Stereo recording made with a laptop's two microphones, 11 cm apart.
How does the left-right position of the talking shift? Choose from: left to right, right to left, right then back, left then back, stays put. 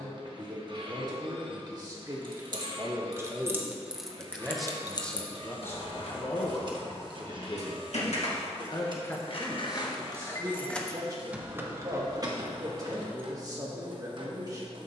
left then back.